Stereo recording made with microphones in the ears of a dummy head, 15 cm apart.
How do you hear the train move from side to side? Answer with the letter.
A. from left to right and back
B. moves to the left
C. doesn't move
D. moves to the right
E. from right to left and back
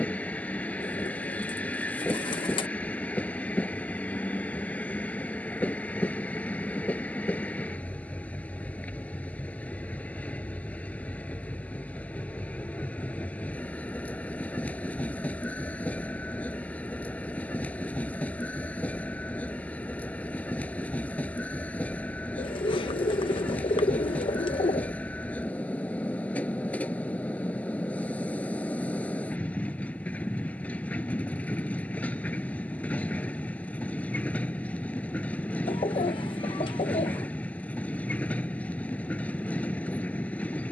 C.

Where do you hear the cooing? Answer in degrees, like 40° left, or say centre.
30° left.